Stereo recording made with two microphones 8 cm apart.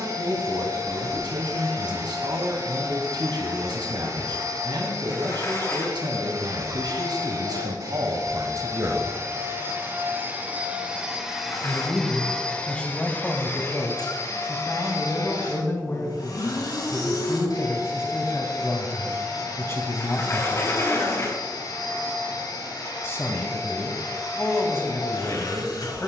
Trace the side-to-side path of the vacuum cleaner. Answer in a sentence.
You can hear the vacuum cleaner move to the left.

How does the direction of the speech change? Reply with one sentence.
In this clip you hear the speech move to the left.